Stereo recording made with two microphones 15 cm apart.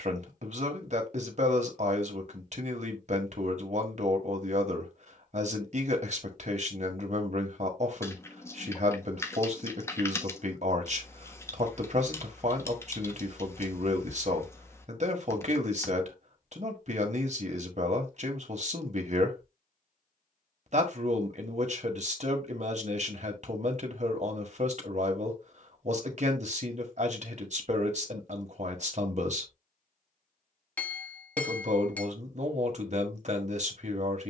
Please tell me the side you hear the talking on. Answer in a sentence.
In this clip you hear the talking on the right.